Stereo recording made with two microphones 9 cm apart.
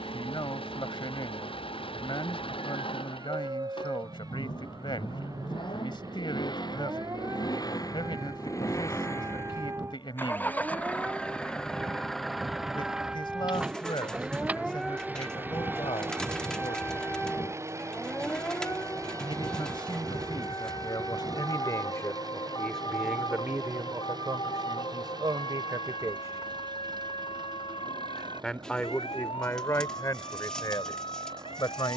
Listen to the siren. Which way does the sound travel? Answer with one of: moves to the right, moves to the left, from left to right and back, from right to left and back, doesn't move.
moves to the left.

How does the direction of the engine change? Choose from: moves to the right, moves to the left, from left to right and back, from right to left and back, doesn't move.
moves to the right.